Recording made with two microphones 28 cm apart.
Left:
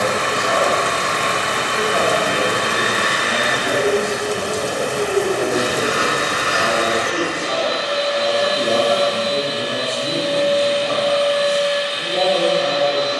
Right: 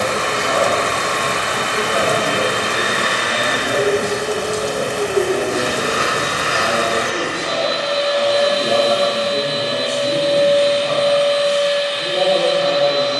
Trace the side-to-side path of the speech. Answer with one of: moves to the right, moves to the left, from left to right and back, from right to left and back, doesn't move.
from right to left and back.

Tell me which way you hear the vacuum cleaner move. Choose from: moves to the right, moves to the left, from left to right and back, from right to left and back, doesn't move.
doesn't move.